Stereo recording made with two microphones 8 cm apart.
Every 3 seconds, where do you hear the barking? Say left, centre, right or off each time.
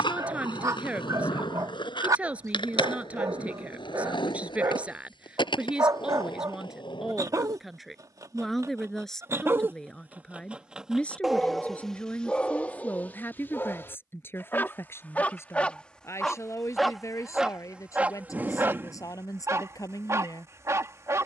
right, right, right, centre, left, centre, right.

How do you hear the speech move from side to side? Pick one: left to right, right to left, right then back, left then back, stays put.
right to left.